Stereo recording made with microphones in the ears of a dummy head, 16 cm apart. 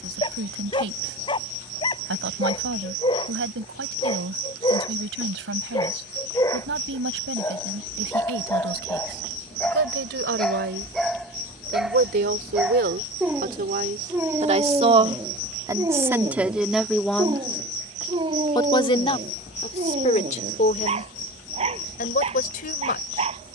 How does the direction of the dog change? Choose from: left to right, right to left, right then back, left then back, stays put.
left to right.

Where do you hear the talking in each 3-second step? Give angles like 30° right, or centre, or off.
80° right, 80° right, 80° right, 70° right, 50° right, 10° right, 40° left, 50° left.